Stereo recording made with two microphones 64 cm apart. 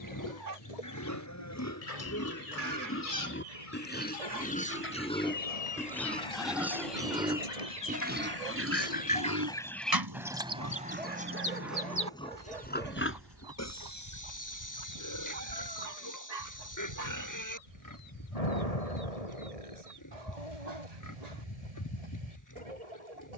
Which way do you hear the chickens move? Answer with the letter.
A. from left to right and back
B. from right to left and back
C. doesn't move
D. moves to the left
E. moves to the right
E.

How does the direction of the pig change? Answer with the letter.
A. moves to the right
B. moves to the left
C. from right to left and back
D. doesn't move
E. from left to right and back
E.